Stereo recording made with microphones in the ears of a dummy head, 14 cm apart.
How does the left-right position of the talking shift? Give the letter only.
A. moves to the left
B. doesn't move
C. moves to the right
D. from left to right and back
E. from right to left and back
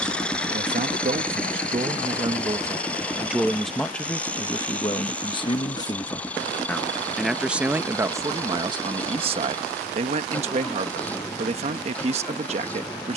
E.